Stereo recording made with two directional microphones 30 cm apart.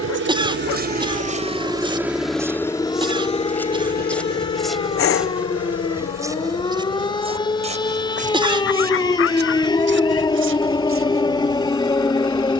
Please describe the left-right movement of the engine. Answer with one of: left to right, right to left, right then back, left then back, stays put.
right to left.